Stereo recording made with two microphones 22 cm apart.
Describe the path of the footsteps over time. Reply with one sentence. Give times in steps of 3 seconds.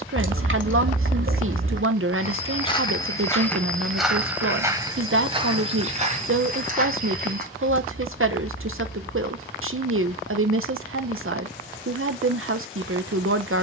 You can hear the footsteps on the left from 0 s, in the centre from 3 s, on the right from 6 s and not at all from 9 s.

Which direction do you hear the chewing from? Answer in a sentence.
In this clip you hear the chewing on the right.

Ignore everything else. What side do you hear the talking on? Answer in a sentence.
In this clip you hear the talking on the right.